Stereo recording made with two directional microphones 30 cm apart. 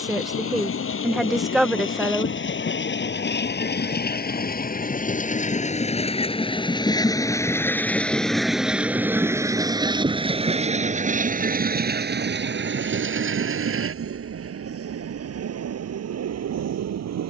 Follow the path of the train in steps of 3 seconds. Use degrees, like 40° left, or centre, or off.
40° left, 30° left, 10° left, 20° right, 50° right, 60° right.